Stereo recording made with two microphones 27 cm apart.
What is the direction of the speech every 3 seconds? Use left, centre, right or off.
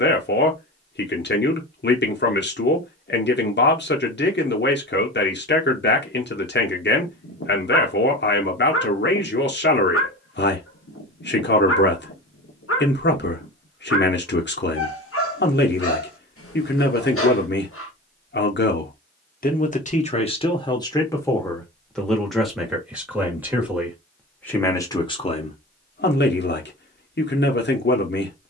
left, left, left, left, left, left, left, centre, left, left.